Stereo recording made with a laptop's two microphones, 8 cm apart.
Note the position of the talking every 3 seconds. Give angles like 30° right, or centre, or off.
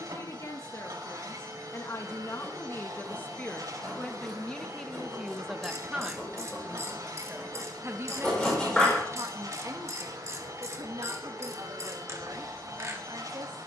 40° left, 10° left, 30° right, 60° right, 70° right.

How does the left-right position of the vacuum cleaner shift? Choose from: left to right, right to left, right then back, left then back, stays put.
stays put.